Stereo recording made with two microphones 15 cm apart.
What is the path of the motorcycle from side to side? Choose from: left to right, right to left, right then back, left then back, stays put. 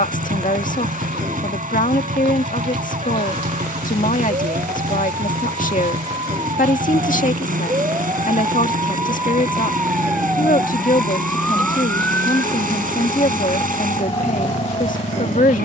stays put.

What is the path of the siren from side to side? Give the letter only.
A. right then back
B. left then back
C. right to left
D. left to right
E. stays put
C.